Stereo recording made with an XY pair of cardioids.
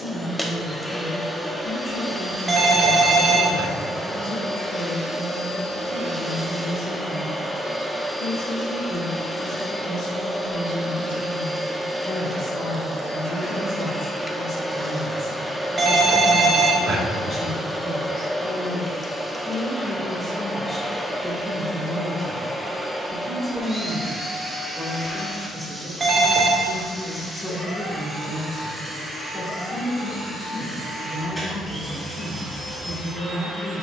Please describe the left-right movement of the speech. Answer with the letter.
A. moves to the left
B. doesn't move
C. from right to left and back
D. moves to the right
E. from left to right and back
E.